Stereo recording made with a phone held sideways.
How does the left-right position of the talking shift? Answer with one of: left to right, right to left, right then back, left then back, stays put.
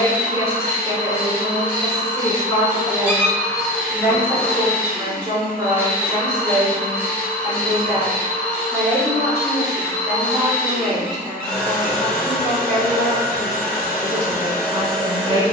right then back.